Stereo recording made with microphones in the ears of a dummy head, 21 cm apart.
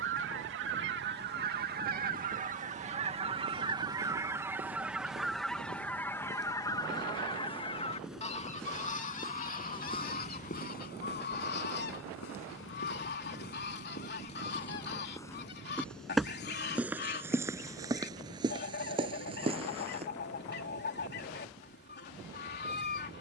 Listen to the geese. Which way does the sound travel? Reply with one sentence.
In this clip you hear the geese go from the right side to the left.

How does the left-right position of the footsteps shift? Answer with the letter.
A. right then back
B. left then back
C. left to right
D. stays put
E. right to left
B.